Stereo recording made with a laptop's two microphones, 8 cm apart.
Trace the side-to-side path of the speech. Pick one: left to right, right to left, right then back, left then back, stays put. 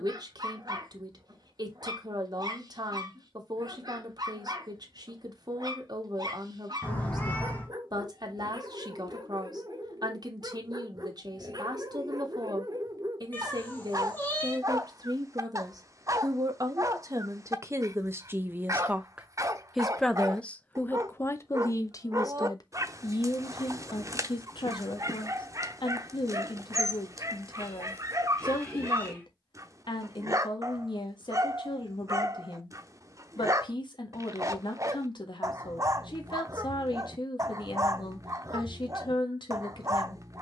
right to left.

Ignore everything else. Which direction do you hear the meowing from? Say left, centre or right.
left.